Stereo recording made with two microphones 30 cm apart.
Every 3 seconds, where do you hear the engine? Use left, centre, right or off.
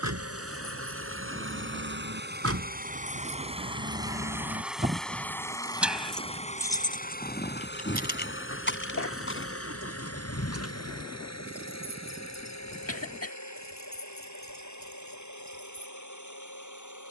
right, centre, left, left, left, left.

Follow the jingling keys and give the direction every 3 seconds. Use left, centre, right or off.
right, right, left, left, left, left.